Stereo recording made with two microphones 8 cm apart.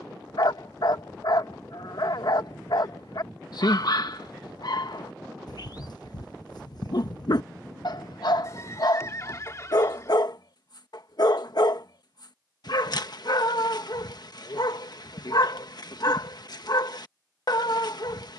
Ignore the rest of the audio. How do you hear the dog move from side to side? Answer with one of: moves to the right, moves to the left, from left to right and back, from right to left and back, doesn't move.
doesn't move.